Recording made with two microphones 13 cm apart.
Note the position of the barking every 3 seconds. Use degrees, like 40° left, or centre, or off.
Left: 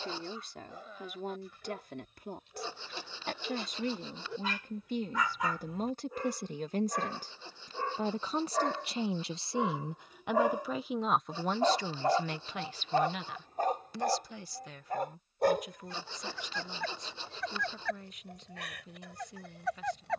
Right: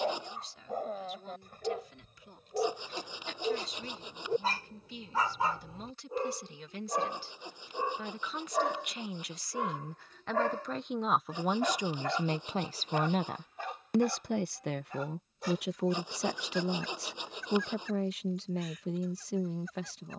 50° right, 40° right, 20° right, 20° left, 40° left, 60° left, 70° left.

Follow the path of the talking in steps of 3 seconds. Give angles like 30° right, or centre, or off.
60° left, 50° left, 40° left, 10° left, 50° right, 80° right, 80° right.